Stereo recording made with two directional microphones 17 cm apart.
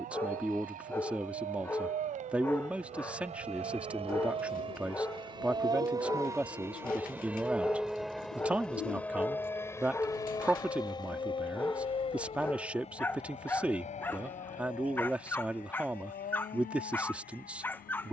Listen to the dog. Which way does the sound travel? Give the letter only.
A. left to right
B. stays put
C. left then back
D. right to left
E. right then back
B.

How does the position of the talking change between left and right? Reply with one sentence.
In this clip you hear the talking stay put.